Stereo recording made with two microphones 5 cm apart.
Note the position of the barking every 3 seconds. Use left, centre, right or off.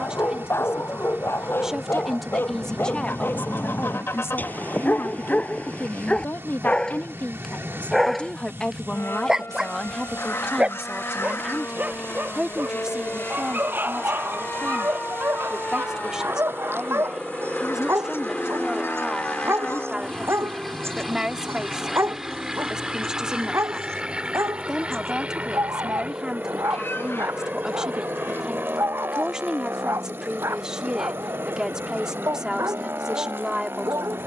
left, left, centre, right, right, right, right, right, right, right, right, right.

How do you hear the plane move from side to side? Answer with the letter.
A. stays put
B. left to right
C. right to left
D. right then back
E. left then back
B.